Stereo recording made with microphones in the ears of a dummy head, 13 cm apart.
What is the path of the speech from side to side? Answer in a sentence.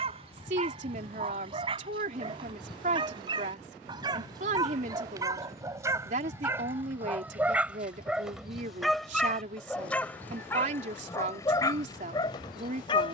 In this clip you hear the speech stay in one place.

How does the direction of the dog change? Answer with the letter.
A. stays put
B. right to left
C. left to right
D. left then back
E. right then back
B.